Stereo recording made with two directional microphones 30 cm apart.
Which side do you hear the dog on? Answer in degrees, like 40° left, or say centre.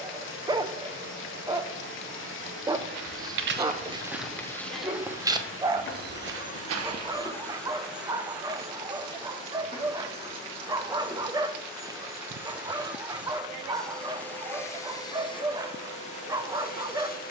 10° right.